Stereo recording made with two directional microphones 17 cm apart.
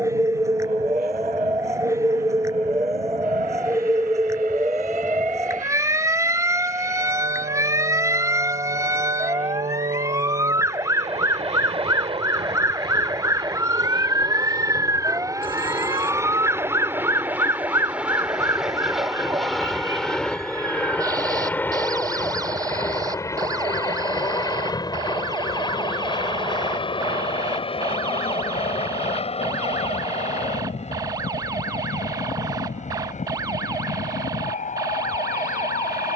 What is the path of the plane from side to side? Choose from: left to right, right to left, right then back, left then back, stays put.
right to left.